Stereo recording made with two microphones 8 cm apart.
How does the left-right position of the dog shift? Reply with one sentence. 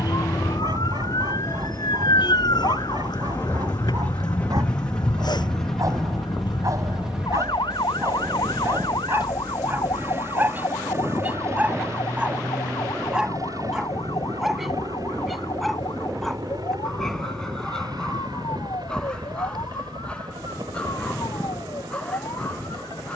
In this clip you hear the dog go from the right side to the left.